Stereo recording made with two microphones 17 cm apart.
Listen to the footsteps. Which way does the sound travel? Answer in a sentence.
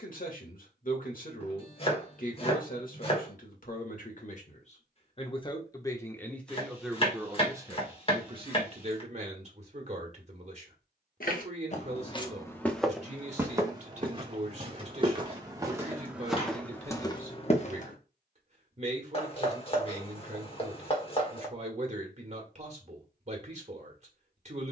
In this clip you hear the footsteps go right and come back.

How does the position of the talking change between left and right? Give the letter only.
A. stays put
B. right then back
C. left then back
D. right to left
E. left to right
E.